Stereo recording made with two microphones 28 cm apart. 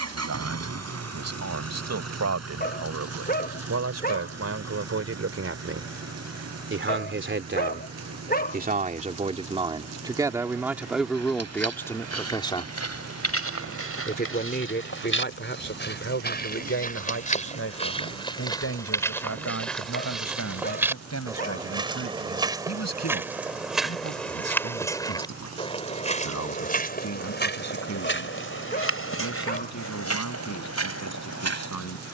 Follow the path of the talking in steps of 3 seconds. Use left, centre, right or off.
right, right, right, centre, left, left, left, left, left, left, left.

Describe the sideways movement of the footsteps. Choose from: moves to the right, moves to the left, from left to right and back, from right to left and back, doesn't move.
from left to right and back.